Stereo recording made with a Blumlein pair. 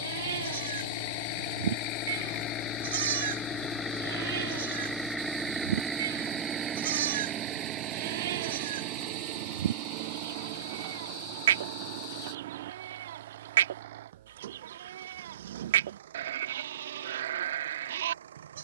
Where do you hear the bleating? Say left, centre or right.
right.